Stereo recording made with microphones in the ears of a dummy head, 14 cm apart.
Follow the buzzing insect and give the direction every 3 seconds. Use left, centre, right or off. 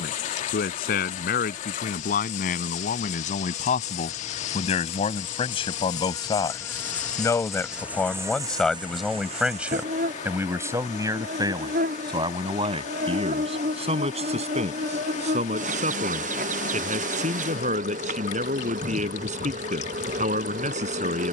left, left, centre, right, right, right, right.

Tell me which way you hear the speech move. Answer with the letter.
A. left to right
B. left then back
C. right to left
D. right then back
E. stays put
A.